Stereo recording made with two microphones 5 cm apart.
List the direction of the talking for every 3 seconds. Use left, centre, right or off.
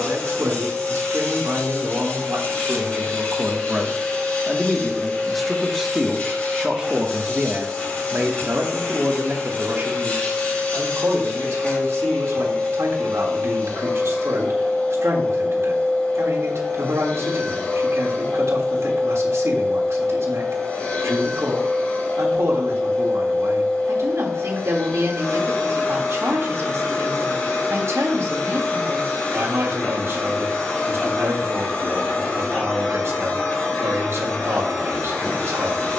right, centre, right, right, right, right, right, right, right, right, right, right.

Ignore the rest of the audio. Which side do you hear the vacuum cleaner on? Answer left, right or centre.
left.